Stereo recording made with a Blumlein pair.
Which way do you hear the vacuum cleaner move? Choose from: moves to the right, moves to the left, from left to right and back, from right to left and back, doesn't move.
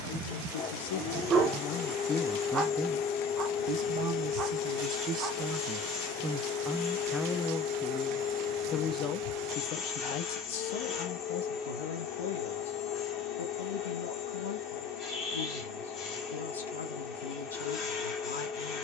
doesn't move.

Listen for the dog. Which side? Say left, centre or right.
right.